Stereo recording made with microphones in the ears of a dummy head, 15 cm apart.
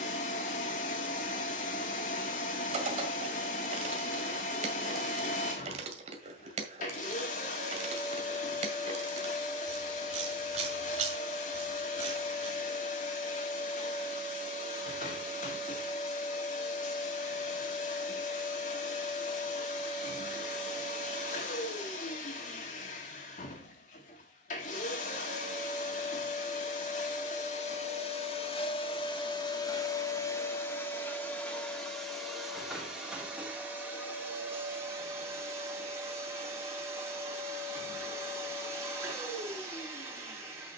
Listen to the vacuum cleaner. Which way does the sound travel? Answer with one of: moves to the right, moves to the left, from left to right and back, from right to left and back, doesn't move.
moves to the right.